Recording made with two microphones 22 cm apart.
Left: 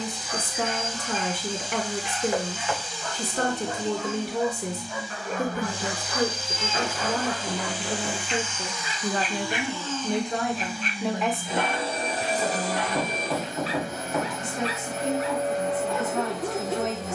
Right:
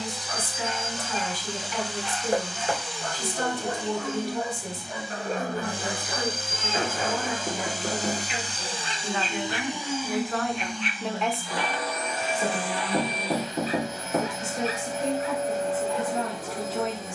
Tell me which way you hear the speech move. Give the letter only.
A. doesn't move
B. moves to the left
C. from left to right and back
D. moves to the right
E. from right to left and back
D.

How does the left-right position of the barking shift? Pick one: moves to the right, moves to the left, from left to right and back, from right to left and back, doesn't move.
moves to the left.